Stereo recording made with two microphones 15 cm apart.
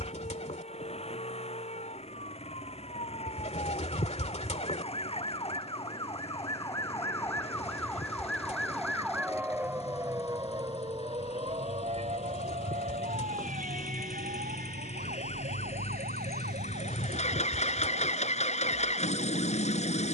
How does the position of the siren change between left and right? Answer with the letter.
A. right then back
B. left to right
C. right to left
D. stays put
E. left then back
B.